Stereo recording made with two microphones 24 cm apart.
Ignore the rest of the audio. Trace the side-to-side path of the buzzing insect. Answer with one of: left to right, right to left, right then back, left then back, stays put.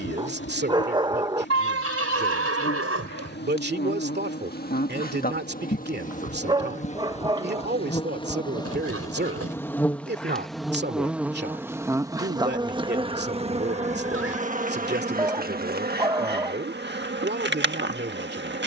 left to right.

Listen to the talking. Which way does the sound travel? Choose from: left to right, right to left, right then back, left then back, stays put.
stays put.